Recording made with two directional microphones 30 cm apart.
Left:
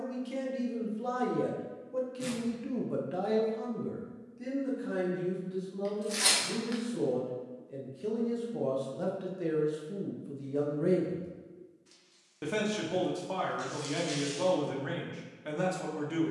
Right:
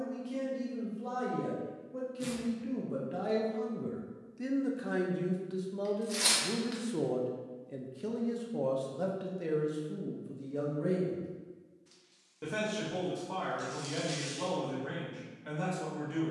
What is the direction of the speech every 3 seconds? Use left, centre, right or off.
left, right, right, centre, left, left.